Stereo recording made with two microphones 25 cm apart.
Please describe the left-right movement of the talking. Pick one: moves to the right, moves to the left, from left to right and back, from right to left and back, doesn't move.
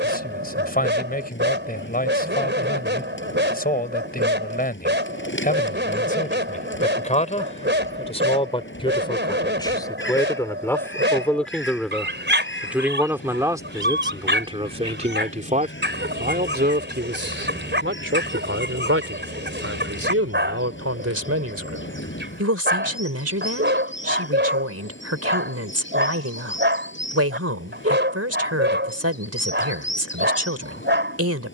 moves to the right.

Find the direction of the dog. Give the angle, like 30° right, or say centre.
40° right.